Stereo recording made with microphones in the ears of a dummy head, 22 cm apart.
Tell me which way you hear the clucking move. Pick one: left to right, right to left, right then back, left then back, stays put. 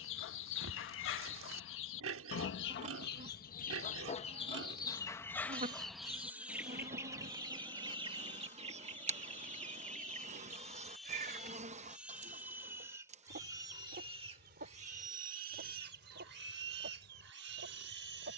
left to right.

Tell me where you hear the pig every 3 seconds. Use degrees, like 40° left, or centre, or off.
60° right, 40° right, centre, centre, 20° right, 40° right.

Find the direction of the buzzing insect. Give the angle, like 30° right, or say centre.
30° right.